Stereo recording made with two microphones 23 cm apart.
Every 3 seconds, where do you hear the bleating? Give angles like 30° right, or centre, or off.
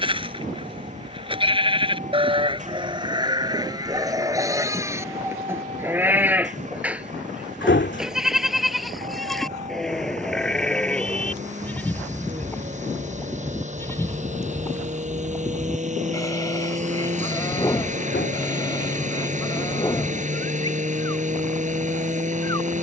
20° right, 10° right, centre, centre, 10° left, 10° left, 20° left, off.